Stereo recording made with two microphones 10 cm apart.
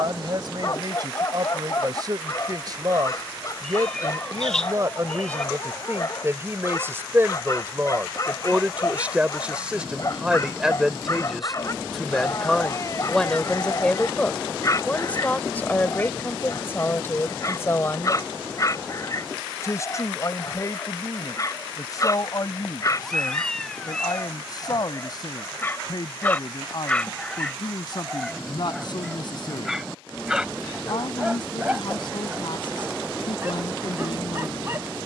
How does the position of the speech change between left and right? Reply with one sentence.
You can hear the speech move to the left.